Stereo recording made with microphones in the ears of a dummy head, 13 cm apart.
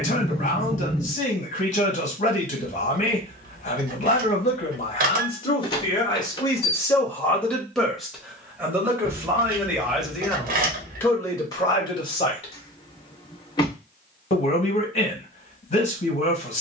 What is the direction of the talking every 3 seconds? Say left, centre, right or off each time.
left, left, centre, centre, left, left.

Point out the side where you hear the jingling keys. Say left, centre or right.
right.